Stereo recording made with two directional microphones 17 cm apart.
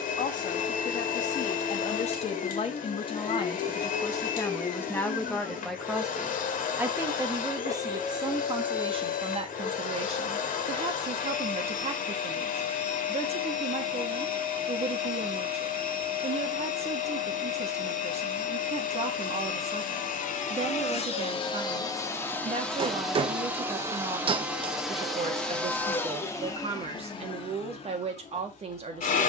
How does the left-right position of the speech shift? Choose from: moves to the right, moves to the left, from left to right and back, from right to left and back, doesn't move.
moves to the right.